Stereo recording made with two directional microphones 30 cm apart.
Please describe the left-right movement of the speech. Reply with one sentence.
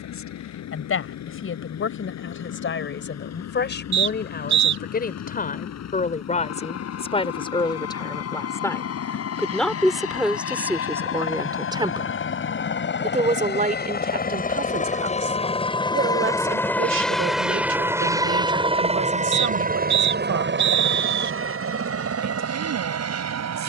You can hear the speech travel towards the right.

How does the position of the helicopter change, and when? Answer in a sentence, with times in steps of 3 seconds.
In this clip you hear the helicopter on the left from 0 s, in the centre from 15 s and on the right from 18 s.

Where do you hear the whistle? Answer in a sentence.
You can hear the whistle on the right.